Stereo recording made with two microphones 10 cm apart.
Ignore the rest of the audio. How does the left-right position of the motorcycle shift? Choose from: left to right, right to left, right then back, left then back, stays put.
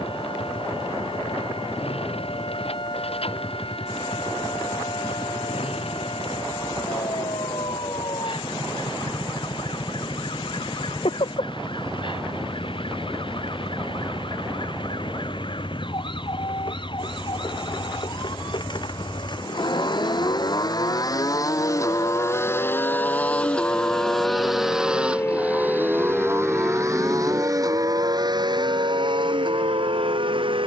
left to right.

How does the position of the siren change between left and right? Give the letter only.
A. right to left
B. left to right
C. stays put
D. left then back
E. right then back
B.